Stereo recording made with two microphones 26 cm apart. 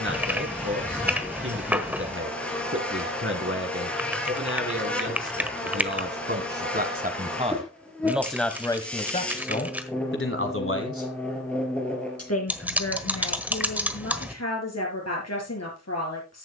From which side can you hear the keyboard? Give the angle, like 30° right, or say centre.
10° right.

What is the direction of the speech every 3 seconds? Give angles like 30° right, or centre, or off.
50° right, 50° right, 20° right, 50° left, 70° left, 80° left.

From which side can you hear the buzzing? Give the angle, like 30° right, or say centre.
centre.